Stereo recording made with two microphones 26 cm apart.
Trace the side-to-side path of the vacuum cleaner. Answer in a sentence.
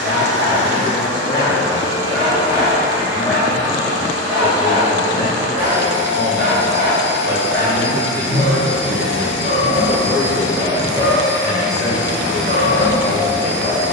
You can hear the vacuum cleaner stay put.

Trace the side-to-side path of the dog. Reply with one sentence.
In this clip you hear the dog move to the right.